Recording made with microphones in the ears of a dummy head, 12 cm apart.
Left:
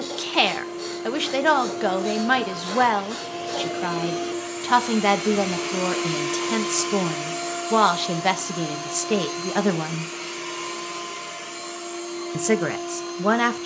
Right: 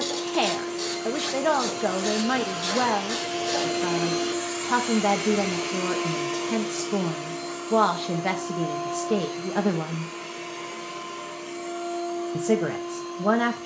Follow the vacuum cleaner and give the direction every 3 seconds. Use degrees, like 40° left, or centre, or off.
50° right, 10° right, 40° left, 70° left, 80° left.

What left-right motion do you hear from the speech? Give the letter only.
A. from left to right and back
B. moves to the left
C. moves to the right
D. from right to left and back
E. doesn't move
E.